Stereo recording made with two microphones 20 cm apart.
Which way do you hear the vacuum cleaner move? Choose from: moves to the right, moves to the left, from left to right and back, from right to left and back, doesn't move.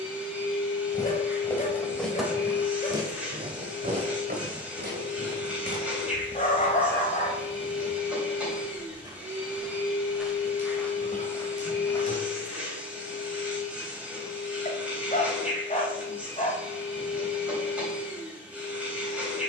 doesn't move.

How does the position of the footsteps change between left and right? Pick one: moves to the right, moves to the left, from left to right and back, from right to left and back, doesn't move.
from left to right and back.